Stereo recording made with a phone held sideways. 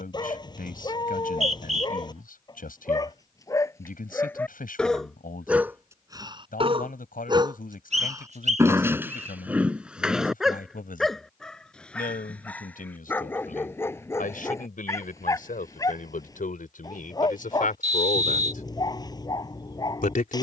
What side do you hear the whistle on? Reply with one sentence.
In this clip you hear the whistle on the right.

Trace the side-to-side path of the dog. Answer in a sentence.
You can hear the dog go right and come back.